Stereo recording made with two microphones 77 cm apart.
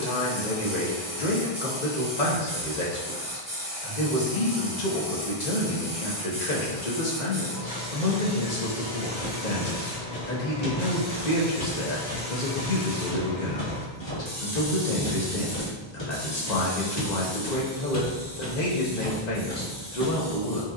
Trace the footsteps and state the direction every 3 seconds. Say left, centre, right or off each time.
off, off, off, left, left, left, centre.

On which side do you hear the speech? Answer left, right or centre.
left.